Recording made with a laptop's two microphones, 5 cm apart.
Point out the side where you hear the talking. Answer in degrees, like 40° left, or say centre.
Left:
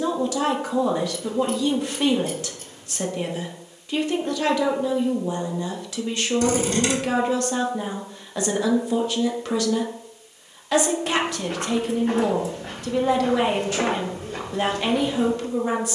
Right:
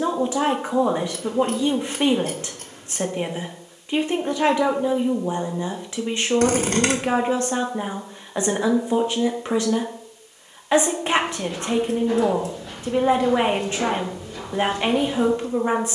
30° right.